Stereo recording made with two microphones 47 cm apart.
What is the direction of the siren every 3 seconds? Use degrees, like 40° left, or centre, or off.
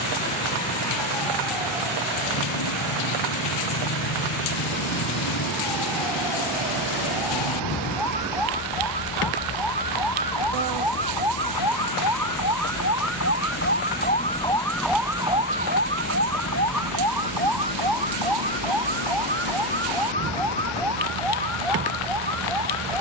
70° left, 70° left, 70° left, 60° left, 30° left, 30° right, 70° right, 80° right.